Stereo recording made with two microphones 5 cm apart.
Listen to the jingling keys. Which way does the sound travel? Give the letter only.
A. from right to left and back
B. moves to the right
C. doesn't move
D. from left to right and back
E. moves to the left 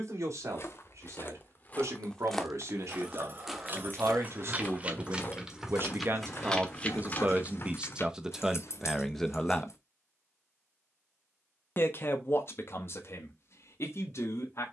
E.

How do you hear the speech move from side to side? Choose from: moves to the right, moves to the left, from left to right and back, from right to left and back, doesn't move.
moves to the left.